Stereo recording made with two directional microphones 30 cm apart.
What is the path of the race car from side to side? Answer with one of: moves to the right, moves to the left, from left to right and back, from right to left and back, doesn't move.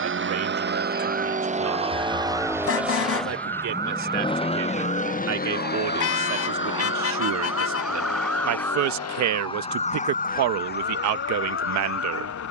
moves to the left.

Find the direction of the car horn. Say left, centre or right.
left.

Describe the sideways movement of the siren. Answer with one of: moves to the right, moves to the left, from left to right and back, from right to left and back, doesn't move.
moves to the left.